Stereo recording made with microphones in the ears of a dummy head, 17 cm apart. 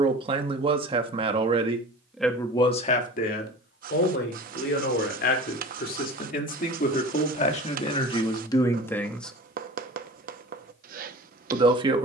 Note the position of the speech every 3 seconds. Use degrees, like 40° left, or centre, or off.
10° right, 50° left, 30° left, 10° right.